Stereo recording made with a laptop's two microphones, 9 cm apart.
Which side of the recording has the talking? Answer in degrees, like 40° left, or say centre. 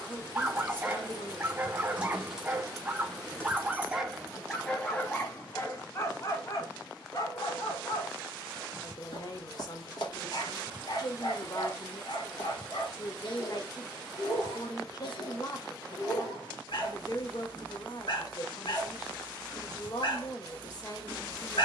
50° left.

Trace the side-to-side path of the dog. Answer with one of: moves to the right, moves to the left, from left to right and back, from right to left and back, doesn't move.
moves to the left.